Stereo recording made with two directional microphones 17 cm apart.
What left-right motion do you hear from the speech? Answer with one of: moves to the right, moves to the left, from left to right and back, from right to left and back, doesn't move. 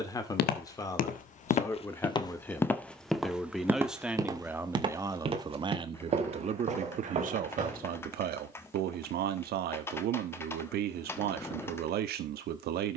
moves to the right.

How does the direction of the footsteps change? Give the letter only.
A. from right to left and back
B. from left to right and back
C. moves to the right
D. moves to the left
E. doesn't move
C.